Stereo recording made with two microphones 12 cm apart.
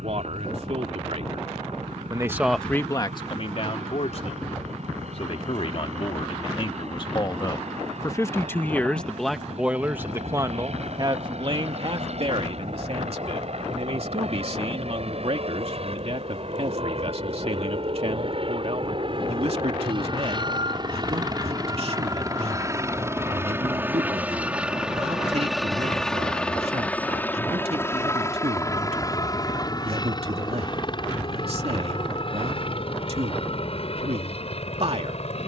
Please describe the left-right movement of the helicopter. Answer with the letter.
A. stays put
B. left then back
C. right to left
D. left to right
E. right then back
C.